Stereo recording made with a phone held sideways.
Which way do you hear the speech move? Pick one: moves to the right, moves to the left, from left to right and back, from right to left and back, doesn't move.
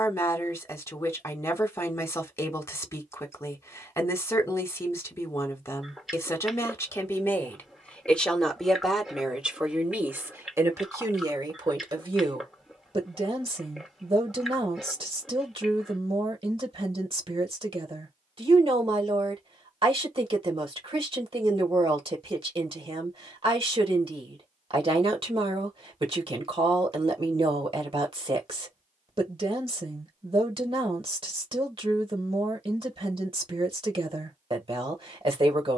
moves to the right.